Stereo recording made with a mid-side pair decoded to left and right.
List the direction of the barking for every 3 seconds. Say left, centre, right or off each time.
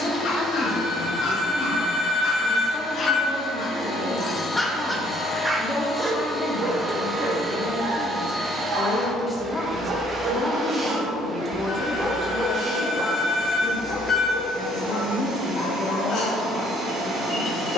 left, centre, right, right, left, left.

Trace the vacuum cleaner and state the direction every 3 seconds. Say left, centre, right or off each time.
left, left, centre, right, right, right.